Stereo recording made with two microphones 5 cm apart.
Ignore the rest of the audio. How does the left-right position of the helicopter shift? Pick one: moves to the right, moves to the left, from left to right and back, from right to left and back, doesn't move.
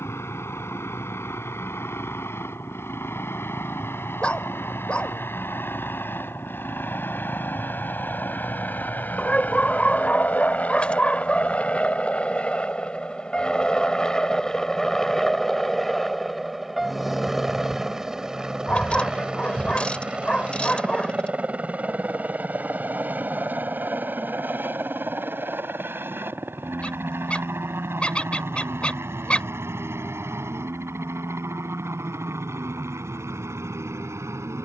moves to the right.